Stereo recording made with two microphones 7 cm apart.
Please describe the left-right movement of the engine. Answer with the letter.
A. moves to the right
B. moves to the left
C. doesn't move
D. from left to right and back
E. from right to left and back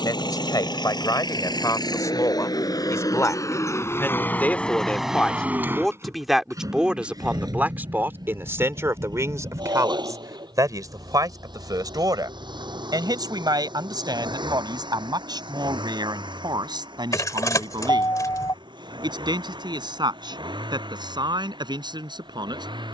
A.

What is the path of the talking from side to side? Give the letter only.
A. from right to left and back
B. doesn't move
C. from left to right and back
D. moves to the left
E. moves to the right
E.